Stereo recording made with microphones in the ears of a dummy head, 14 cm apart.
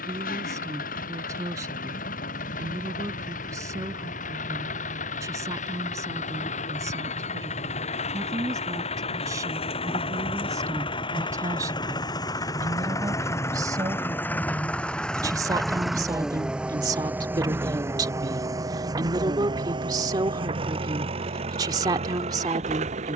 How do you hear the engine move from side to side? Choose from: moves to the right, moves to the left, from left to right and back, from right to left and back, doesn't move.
moves to the right.